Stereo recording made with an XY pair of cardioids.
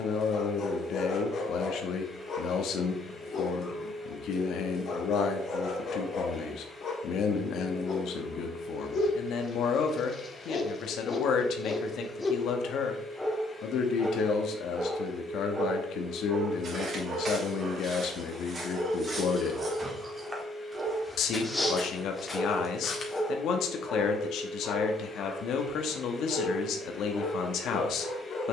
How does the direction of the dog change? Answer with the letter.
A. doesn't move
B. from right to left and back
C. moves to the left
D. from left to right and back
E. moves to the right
D.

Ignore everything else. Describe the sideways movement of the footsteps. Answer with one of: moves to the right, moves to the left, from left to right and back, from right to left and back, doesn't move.
moves to the left.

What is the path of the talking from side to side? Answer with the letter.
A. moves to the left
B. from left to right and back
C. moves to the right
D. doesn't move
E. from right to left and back
D.